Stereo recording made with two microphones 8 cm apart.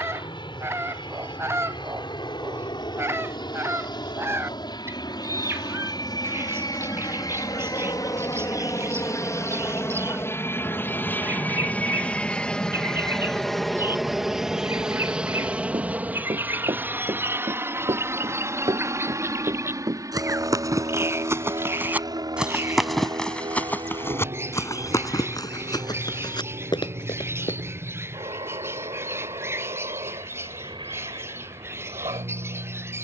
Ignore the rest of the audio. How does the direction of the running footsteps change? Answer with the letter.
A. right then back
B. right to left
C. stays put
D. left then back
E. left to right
B.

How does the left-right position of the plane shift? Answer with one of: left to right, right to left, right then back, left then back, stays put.
left to right.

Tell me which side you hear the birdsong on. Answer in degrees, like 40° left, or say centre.
30° right.